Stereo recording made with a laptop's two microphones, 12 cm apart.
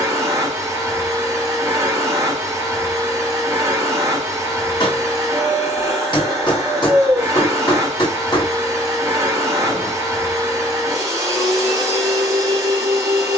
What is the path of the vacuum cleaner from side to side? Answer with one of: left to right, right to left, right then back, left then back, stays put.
stays put.